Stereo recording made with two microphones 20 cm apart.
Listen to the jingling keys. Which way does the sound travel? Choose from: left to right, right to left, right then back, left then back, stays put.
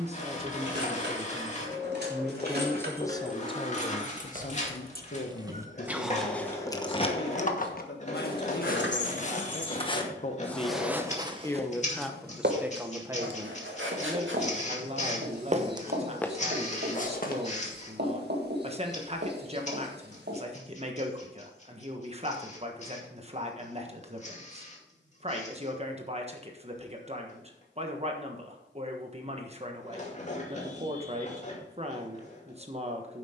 right to left.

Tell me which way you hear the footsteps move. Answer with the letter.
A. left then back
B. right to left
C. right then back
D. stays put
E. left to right
C.